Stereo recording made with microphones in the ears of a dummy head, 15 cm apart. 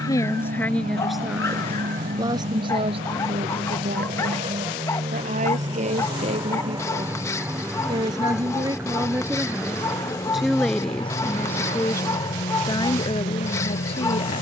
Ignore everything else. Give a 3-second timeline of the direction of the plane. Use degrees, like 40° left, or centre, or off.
50° right, 40° right, 10° right, 20° left, 40° left.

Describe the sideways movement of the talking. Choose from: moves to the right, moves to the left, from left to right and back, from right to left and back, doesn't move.
from left to right and back.